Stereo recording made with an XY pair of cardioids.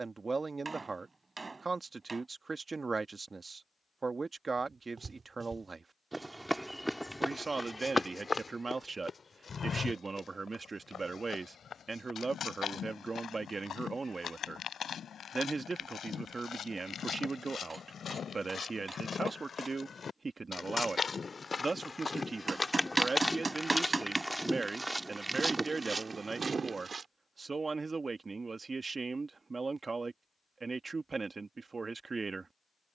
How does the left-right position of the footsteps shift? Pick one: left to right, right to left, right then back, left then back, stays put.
left then back.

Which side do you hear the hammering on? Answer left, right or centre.
right.